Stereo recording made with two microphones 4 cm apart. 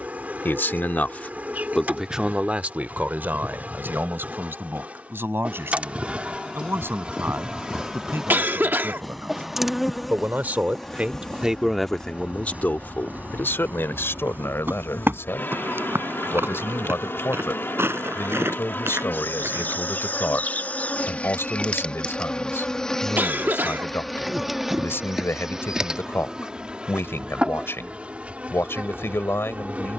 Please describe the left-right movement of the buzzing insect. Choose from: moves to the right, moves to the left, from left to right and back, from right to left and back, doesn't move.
from right to left and back.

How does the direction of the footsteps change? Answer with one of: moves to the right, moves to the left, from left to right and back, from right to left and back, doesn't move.
moves to the right.